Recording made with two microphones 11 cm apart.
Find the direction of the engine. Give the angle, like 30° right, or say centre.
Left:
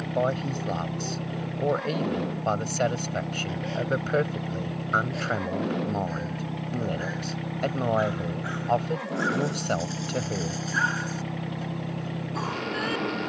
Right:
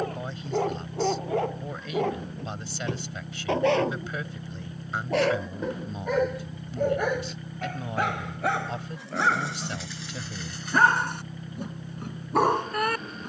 80° left.